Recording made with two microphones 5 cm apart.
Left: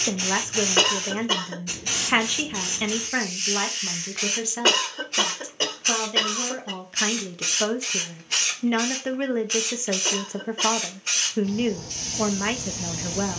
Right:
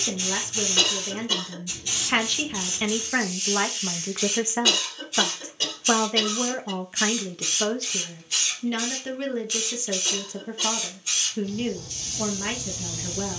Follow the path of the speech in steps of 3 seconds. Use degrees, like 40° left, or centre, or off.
20° left, 20° right, centre, 30° left, 30° left.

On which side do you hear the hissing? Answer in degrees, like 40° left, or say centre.
50° left.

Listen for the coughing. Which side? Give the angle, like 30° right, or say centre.
40° left.